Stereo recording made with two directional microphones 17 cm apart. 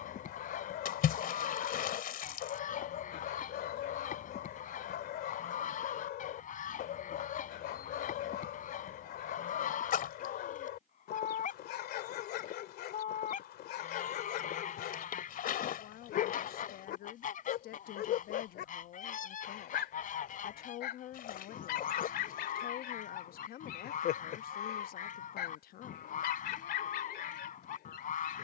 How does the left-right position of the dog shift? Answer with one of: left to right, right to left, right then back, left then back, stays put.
stays put.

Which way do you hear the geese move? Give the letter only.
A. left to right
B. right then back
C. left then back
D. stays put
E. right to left
D.